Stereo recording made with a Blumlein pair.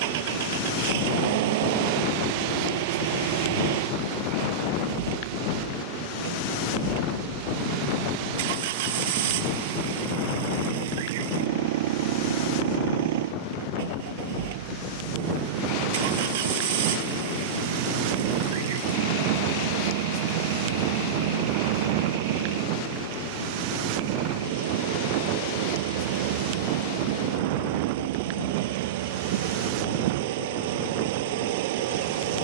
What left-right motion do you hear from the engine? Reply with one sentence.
You can hear the engine stay put.